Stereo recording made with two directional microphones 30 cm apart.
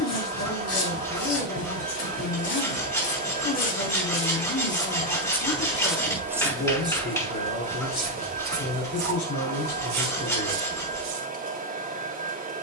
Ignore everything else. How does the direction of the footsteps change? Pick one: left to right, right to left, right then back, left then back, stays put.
left to right.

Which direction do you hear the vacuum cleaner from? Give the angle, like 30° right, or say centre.
30° right.